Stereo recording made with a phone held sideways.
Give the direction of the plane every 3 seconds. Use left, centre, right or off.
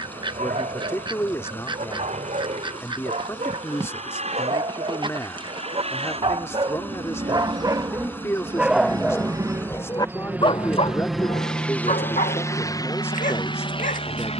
right, right, right, centre, left.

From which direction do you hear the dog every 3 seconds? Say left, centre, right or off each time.
right, right, right, left, left.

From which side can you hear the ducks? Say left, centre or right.
right.